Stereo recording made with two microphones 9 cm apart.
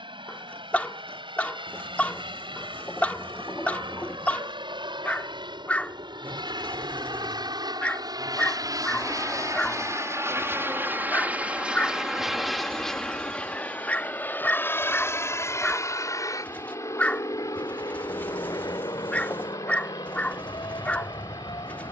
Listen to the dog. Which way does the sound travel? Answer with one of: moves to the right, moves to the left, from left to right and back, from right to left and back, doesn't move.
doesn't move.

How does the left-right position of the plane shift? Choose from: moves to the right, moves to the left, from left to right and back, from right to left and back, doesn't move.
moves to the left.